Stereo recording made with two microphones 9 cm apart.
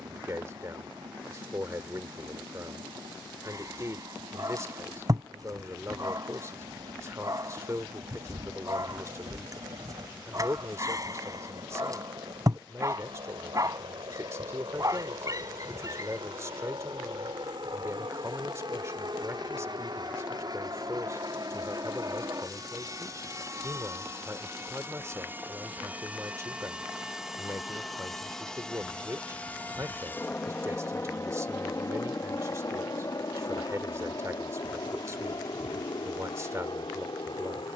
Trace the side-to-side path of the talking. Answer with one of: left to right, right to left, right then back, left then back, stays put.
stays put.